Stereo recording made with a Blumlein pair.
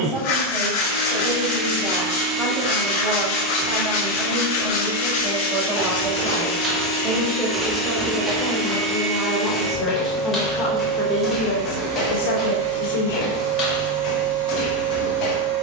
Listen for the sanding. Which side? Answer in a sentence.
You can hear the sanding on the left.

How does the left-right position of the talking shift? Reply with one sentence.
In this clip you hear the talking go from the right side to the left.